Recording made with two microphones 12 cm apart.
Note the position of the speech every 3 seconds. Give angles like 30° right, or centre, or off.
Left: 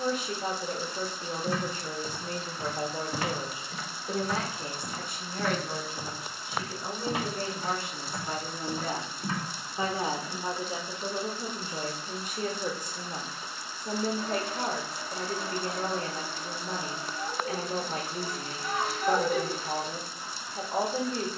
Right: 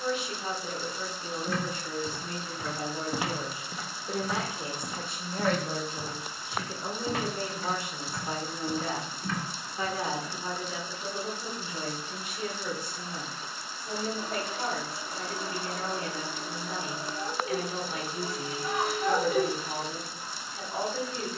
40° left, 10° right, 20° right, 30° left, 40° left, 40° left, 40° left.